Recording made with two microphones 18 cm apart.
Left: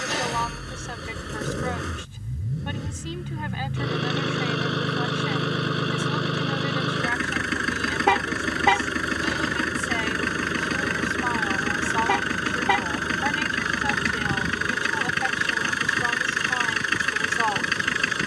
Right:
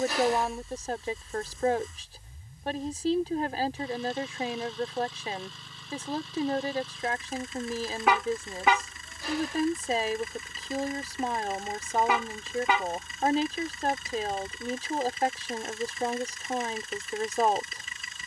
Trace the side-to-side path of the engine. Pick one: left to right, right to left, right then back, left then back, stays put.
stays put.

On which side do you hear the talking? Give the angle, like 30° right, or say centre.
40° right.